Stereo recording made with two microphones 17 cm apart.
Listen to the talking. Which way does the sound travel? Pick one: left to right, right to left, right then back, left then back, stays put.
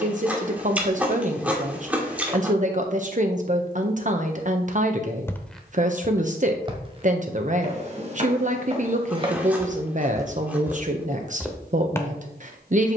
stays put.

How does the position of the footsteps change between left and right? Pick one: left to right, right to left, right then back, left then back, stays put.
right then back.